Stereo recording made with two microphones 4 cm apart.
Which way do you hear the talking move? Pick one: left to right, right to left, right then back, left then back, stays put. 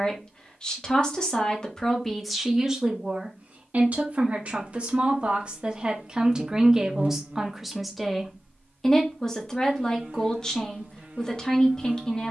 right then back.